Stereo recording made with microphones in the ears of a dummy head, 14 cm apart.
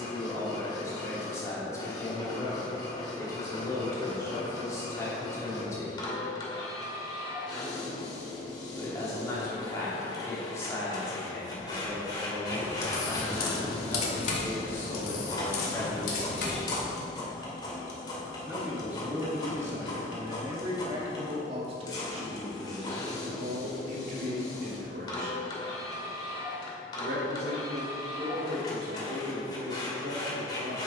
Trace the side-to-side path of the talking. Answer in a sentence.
You can hear the talking go from the left side to the right.